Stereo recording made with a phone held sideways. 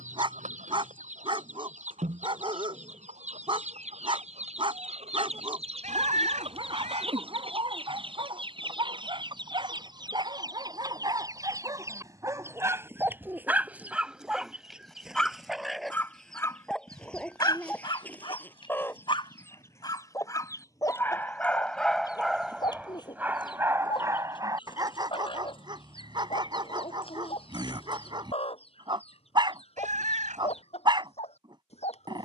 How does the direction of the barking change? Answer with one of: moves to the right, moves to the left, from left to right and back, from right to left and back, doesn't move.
from right to left and back.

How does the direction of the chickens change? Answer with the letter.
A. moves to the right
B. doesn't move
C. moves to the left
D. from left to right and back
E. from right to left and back
C.